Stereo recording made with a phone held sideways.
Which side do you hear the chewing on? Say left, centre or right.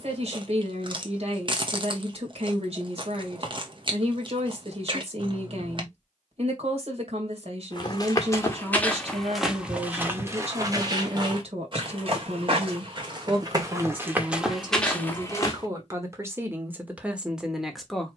right.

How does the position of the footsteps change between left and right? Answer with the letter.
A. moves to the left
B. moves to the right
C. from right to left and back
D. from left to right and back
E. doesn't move
D.